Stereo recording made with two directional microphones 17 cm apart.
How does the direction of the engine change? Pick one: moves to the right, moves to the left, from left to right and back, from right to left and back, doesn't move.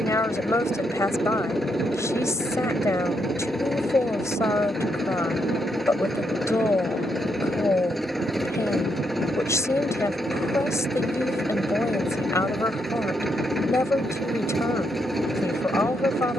doesn't move.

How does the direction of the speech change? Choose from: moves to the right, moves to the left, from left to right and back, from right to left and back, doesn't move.
doesn't move.